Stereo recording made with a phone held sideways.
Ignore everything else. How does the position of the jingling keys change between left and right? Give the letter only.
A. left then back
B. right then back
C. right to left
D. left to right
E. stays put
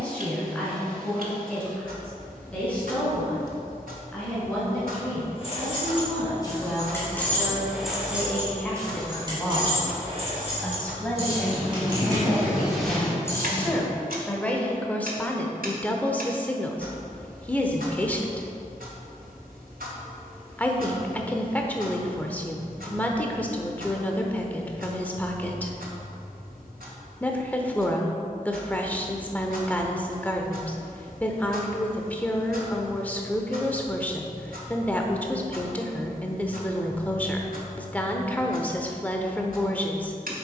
B.